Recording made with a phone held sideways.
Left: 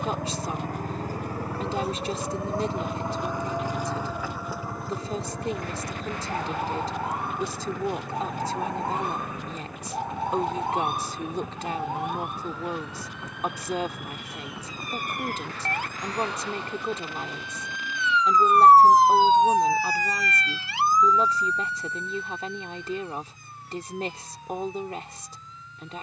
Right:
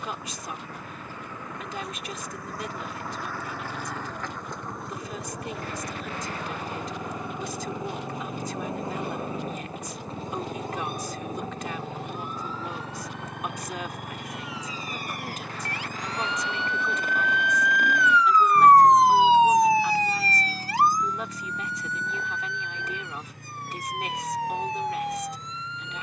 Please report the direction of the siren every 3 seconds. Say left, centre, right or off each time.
left, left, left, left, left, left, centre, right, right.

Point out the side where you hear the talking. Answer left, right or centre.
left.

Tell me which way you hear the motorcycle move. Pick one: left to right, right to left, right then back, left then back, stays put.
left to right.